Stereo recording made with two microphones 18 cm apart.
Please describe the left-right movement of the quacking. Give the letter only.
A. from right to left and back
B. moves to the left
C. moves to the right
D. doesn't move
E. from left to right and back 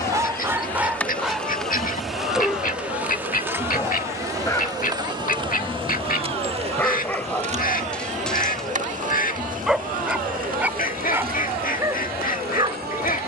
D.